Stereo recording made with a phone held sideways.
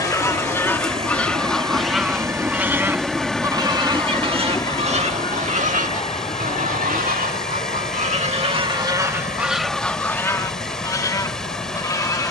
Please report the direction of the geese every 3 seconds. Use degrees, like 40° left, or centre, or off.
centre, 40° right, 50° right, 10° left.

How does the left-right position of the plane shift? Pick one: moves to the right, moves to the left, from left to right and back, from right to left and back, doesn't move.
moves to the left.